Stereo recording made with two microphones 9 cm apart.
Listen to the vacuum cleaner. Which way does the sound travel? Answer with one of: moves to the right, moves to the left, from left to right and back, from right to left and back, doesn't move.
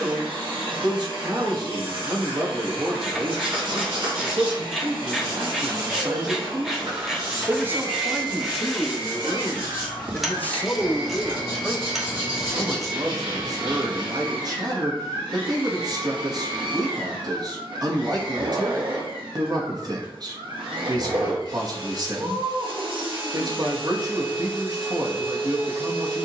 doesn't move.